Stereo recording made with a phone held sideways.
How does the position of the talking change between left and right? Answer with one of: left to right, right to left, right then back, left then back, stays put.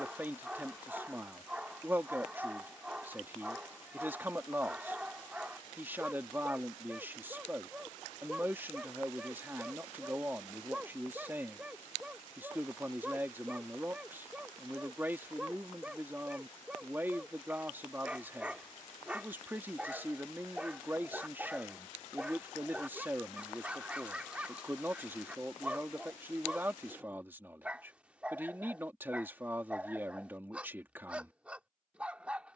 stays put.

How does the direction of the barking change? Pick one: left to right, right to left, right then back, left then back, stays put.
stays put.